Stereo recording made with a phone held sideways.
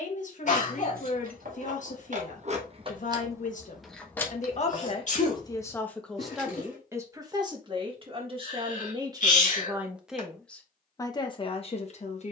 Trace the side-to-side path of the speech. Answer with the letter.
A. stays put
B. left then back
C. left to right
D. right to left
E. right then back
E.